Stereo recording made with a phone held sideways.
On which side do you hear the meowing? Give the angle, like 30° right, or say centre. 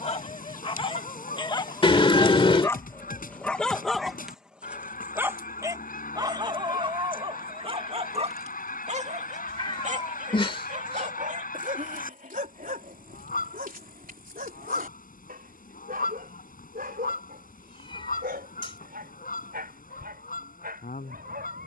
30° left.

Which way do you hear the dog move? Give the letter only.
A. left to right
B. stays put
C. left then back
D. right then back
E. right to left
A.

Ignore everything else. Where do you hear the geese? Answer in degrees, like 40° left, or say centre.
60° left.